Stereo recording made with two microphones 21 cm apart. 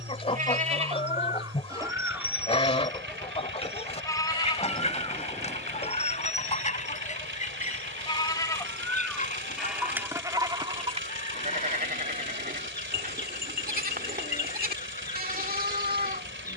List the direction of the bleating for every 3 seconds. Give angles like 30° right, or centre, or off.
20° right, 20° left, 30° left, 20° right, 40° right, 40° right.